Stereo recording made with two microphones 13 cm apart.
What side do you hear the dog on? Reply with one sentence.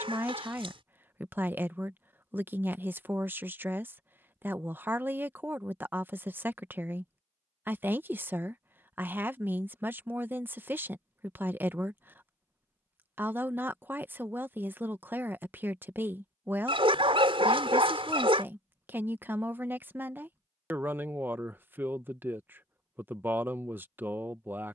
In this clip you hear the dog on the right.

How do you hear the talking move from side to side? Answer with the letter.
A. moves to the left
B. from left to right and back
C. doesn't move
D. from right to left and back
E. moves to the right
C.